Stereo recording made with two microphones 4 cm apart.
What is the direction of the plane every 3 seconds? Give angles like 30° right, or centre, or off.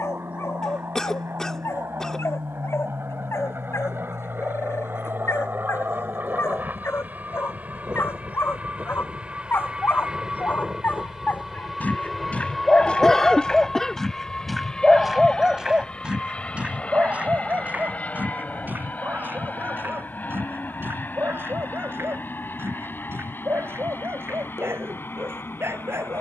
70° right, 50° right, 40° right, 10° right, 10° left, 30° left, 40° left, 50° left, 50° left.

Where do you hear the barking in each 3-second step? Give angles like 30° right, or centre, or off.
80° left, 70° left, 60° left, 50° left, 10° left, 30° right, 50° right, 60° right, 70° right.